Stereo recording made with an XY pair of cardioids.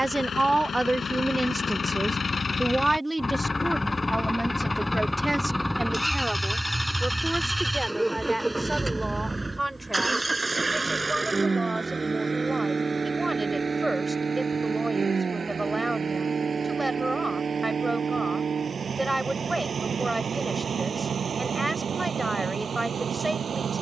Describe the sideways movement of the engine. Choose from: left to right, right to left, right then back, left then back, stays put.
left to right.